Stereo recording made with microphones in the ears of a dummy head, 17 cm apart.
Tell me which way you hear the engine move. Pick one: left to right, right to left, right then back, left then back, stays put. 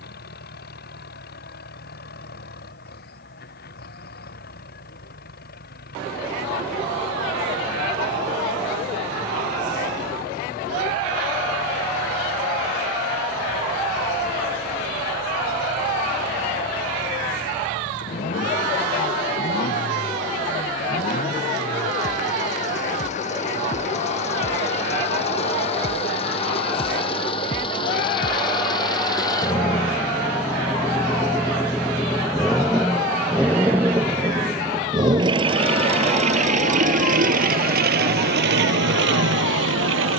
left to right.